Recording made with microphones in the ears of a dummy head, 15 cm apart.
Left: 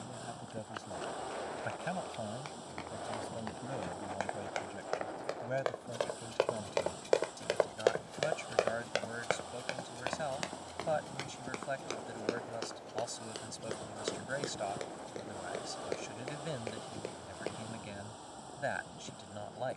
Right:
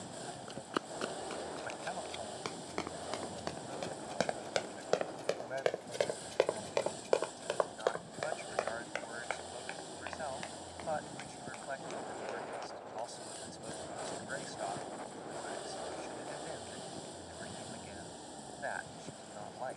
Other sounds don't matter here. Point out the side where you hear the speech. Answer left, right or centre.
left.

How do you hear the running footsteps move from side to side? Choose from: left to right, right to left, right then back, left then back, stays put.
right to left.